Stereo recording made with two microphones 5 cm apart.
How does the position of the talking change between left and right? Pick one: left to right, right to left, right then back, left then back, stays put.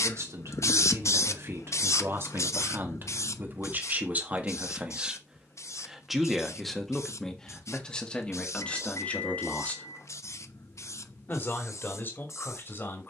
right to left.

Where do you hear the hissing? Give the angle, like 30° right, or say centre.
70° left.